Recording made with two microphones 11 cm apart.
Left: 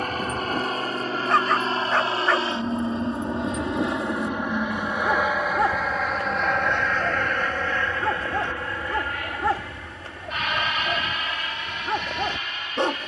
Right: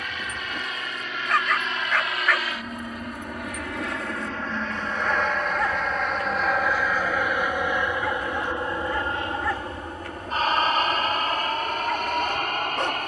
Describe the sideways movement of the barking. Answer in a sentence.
You can hear the barking stay put.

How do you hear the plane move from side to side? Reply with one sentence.
You can hear the plane move from left to right.